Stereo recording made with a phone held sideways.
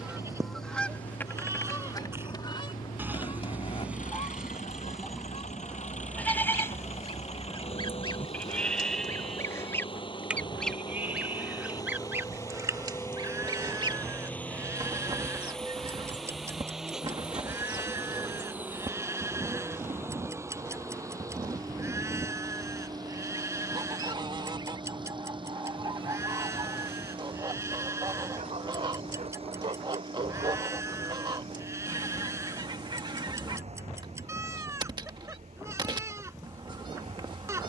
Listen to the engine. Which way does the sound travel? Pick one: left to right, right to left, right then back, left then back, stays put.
left to right.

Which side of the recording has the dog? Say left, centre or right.
right.